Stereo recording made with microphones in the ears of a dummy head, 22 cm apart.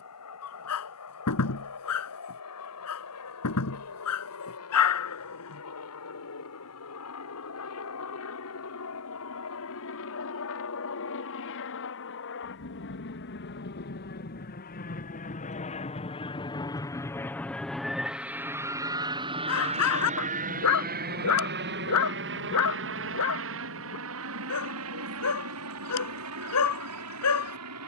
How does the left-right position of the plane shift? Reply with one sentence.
You can hear the plane move to the right.